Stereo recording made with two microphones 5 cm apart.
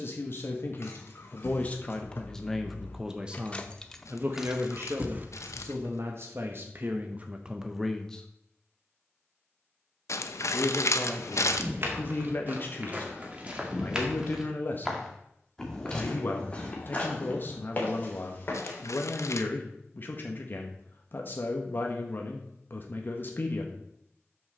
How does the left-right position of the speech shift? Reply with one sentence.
You can hear the speech move from left to right and back again.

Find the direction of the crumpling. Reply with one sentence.
You can hear the crumpling on the left.